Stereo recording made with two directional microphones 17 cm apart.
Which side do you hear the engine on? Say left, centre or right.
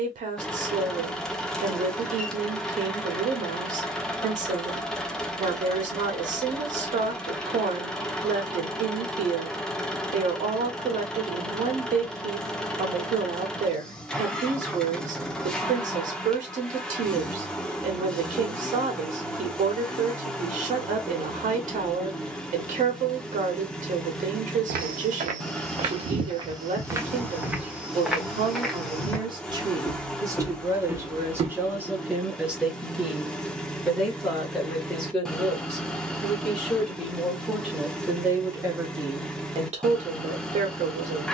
centre.